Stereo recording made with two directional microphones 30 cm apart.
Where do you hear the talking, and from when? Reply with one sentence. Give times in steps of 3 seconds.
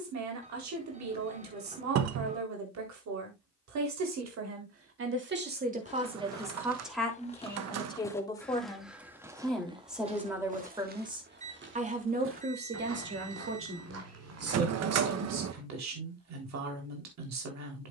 You can hear the talking on the right from 0 s, in the centre from 6 s and on the right from 12 s.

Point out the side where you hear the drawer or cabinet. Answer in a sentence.
In this clip you hear the drawer or cabinet on the right.